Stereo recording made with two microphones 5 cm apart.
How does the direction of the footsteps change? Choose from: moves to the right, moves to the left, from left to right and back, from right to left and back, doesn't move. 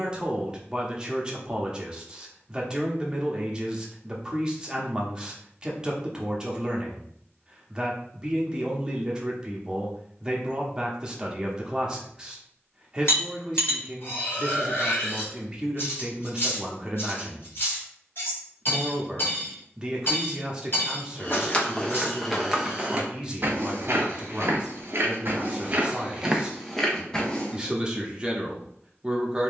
from left to right and back.